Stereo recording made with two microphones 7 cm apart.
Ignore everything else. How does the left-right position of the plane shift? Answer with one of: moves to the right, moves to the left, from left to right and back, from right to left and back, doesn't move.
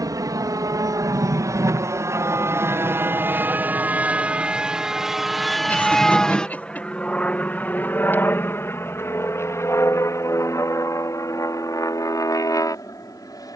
moves to the left.